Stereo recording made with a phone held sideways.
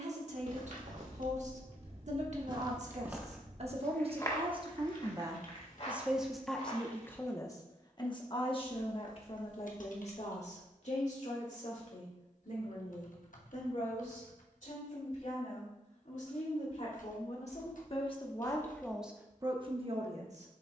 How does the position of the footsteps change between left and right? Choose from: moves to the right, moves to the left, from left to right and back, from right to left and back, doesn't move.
moves to the left.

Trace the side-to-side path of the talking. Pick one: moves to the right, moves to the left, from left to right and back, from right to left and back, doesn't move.
from right to left and back.